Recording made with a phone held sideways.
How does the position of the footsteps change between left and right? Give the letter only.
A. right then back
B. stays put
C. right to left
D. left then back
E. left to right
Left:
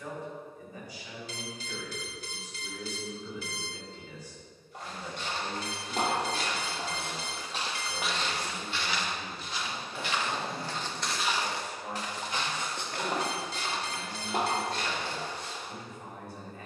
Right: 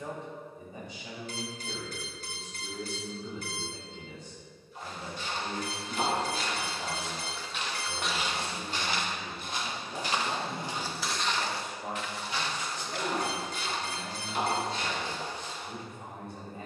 A.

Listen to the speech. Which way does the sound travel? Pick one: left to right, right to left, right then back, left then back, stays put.
stays put.